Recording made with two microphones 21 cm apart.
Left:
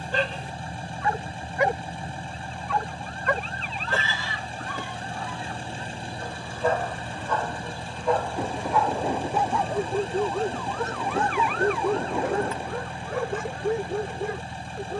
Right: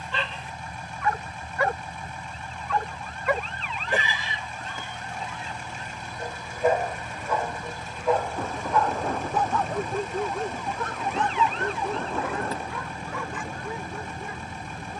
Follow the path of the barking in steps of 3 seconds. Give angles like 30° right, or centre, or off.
20° left, 20° right, 10° right, 20° left, 50° left.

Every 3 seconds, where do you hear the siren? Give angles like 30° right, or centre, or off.
50° left, 40° left, 20° left, 20° right, 50° right.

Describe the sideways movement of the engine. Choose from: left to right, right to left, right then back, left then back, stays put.
stays put.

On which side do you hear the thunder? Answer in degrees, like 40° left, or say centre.
10° left.